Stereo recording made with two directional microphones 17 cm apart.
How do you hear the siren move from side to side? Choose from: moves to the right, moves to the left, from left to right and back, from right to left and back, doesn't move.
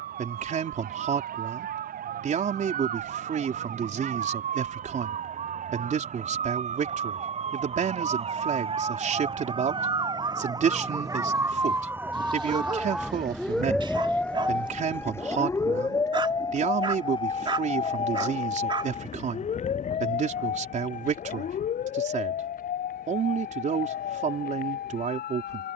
moves to the left.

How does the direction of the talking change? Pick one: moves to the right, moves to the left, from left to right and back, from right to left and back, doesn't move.
doesn't move.